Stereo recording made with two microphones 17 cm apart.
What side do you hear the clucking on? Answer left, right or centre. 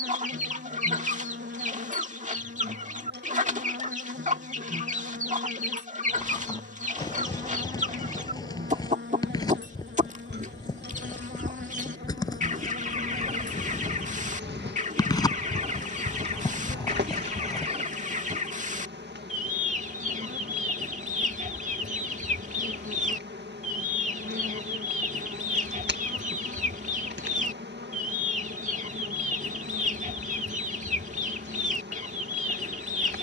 right.